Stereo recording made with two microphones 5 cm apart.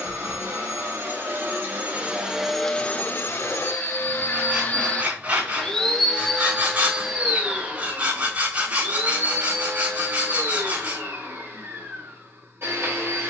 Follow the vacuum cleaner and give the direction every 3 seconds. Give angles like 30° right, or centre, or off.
30° right, 40° left, 20° right, 50° right, 50° right.